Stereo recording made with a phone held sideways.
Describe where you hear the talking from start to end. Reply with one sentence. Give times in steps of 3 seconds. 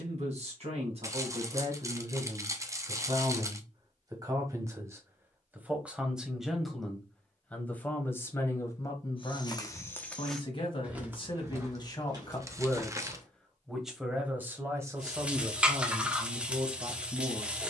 You can hear the talking on the right from 0 s, in the centre from 6 s, on the left from 9 s, in the centre from 12 s and on the right from 15 s.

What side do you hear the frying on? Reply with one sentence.
In this clip you hear the frying in the centre.